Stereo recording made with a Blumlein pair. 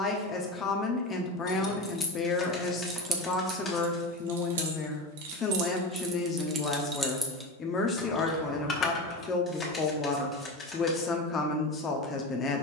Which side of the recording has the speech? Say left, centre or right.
left.